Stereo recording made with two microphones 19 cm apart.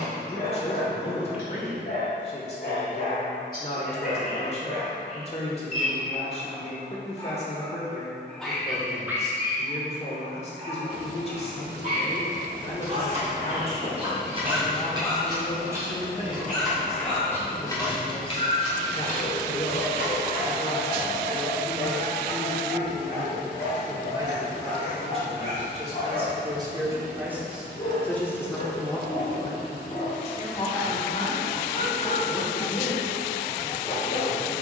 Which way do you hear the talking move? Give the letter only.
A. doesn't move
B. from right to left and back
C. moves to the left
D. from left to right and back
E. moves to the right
D.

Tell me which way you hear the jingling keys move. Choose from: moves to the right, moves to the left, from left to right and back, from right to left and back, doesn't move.
moves to the left.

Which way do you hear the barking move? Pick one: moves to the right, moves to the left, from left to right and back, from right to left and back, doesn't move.
from left to right and back.